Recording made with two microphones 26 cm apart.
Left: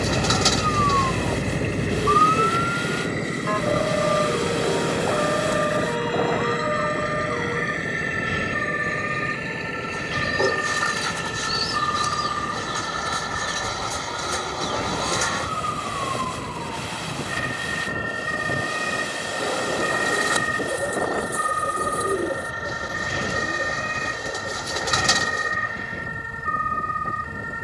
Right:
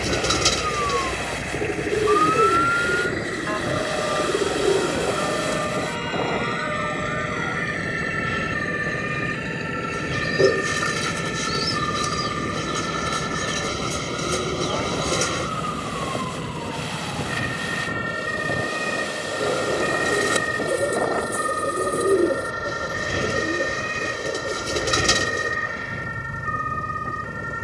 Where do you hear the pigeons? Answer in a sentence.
In this clip you hear the pigeons on the right.